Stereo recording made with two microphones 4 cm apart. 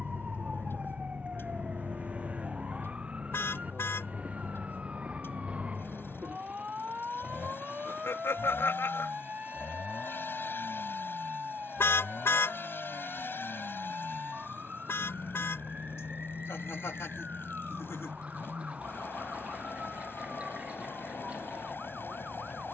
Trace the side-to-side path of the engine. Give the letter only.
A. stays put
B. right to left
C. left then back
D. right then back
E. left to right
A.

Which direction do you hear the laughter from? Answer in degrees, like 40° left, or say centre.
80° left.